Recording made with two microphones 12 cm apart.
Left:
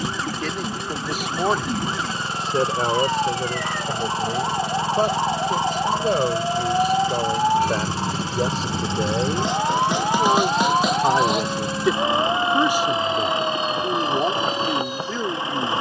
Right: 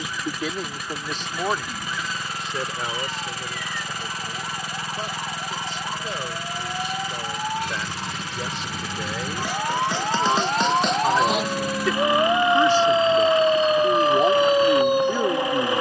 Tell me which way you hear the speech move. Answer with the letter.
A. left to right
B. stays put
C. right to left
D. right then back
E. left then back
E.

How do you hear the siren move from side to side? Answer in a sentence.
In this clip you hear the siren move from left to right.